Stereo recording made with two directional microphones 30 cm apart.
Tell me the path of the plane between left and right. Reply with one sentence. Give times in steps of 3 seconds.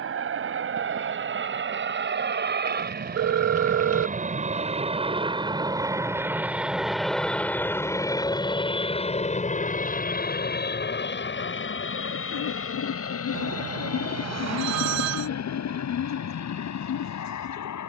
In this clip you hear the plane on the right from 0 s, in the centre from 6 s and on the left from 9 s.